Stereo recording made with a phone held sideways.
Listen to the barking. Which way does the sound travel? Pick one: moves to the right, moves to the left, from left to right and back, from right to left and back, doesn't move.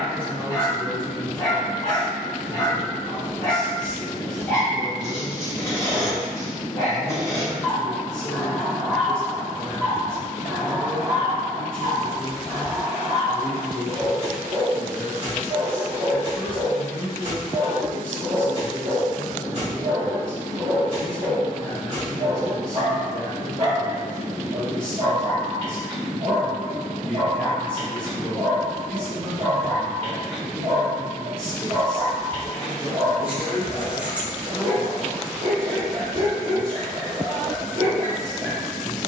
moves to the right.